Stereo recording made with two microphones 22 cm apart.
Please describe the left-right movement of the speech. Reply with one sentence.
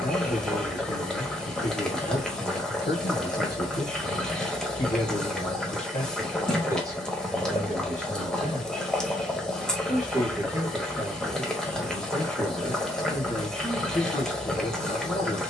You can hear the speech move from left to right and back again.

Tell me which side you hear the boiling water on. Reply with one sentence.
You can hear the boiling water in the centre.